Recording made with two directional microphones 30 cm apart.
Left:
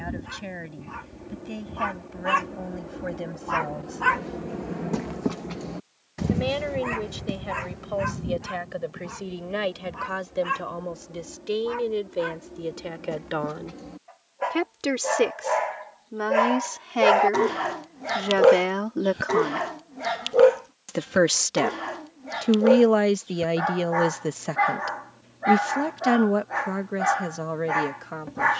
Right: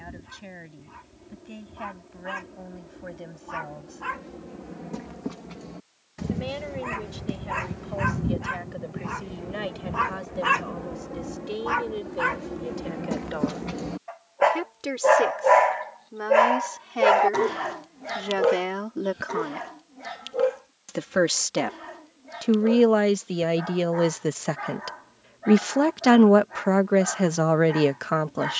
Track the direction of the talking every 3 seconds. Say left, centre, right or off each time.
left, left, left, left, left, left, left, centre, right, right.